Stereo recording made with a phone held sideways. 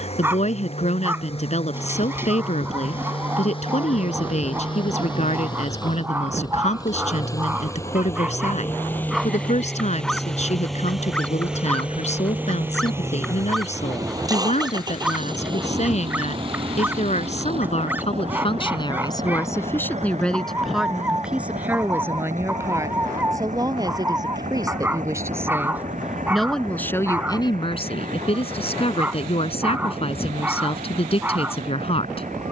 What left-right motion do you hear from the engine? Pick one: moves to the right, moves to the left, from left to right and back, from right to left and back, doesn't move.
moves to the right.